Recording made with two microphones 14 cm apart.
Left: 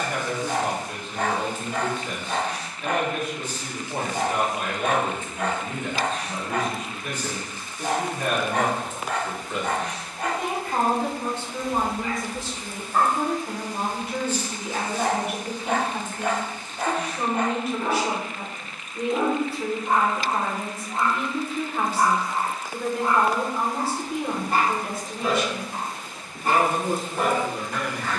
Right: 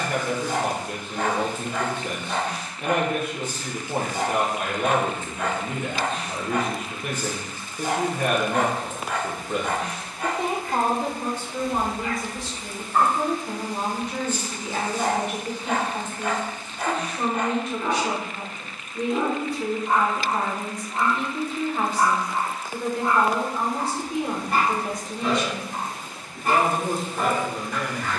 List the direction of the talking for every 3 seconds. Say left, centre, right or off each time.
right, right, right, right, centre, centre, centre, centre, centre, centre.